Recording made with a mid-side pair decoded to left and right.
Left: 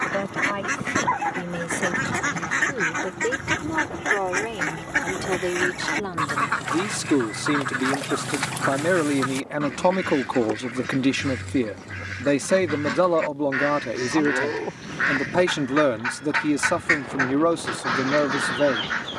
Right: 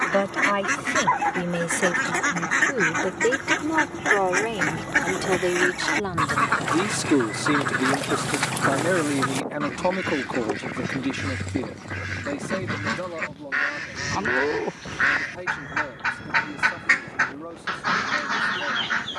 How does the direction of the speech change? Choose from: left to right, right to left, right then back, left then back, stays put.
right to left.